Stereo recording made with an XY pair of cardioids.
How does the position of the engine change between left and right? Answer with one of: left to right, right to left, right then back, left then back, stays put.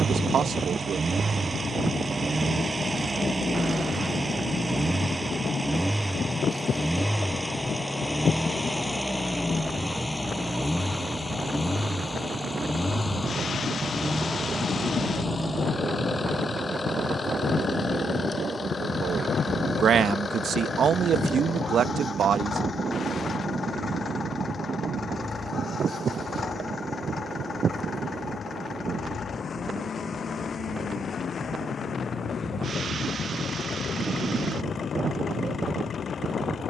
right to left.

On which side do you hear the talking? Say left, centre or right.
right.